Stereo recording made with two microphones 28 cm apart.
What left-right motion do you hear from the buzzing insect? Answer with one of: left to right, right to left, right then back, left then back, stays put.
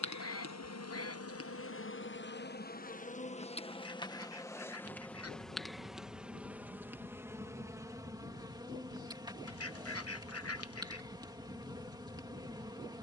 left to right.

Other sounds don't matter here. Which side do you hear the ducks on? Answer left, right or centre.
left.